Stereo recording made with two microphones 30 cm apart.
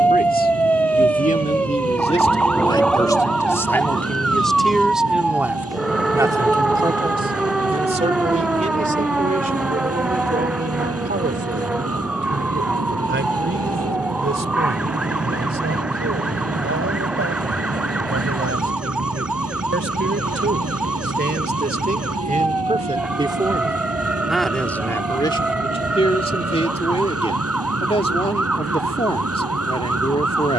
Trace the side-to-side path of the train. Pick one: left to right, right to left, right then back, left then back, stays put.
stays put.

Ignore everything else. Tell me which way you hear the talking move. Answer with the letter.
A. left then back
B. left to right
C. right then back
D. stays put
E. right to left
C.